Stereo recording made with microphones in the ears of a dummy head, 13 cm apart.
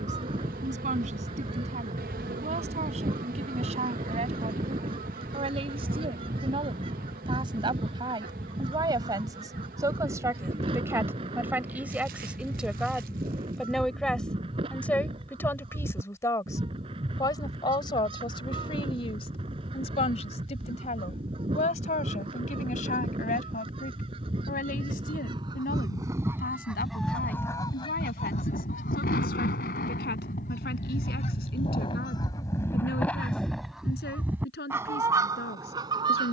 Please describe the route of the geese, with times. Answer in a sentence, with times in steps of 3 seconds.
In this clip you hear the geese on the right from 0 s, on the left from 27 s and in the centre from 33 s.